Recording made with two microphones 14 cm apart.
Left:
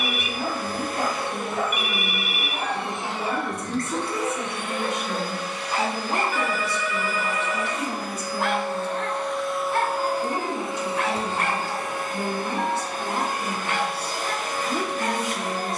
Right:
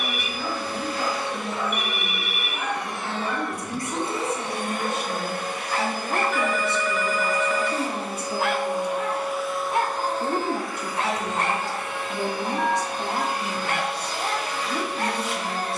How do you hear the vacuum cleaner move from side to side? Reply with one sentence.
In this clip you hear the vacuum cleaner move from left to right and back again.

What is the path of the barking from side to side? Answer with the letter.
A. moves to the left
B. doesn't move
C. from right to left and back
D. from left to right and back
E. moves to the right
E.